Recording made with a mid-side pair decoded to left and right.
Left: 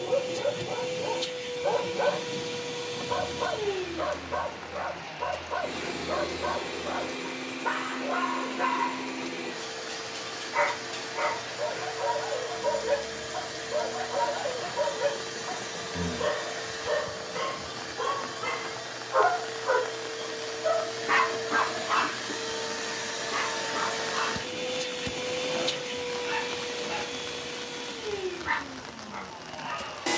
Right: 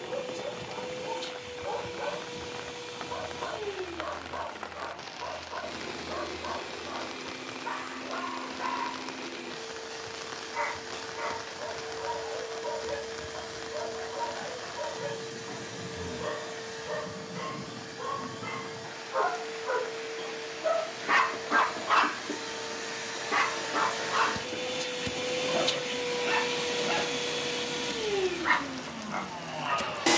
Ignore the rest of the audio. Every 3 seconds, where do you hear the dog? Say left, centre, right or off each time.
left, left, left, left, left, left, left, right, right, right.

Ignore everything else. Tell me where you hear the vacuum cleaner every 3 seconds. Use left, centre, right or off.
left, left, left, left, left, left, left, left, centre, right.